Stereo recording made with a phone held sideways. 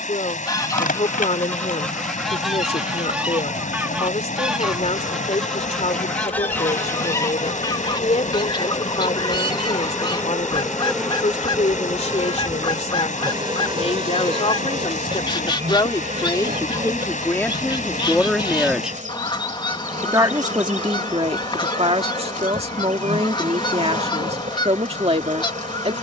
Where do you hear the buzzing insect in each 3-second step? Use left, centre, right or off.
left, left, left, centre, right, right, right, right, right.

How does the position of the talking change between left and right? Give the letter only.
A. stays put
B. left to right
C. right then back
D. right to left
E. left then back
B.